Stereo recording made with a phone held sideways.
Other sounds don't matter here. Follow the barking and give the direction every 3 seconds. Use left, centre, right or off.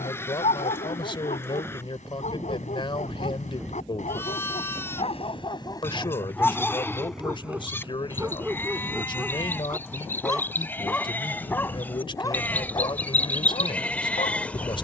left, left, centre, centre, left.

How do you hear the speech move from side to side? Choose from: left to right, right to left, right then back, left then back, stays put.
stays put.